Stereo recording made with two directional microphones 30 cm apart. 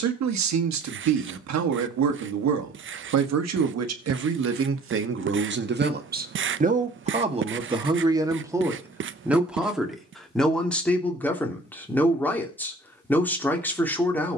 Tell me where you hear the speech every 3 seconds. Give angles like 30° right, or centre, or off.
60° right, 50° right, 20° right, centre, 10° left.